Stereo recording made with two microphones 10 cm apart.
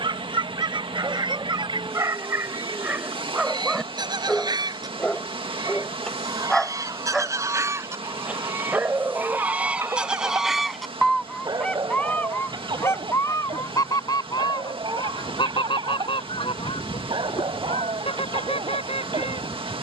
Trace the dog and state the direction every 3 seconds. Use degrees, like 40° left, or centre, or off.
40° right, centre, 10° right, 30° right, 50° right, 60° right, 60° right.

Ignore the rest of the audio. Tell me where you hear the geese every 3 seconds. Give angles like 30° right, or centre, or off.
50° right, 50° right, 30° right, centre, 30° left, 60° left, 70° left.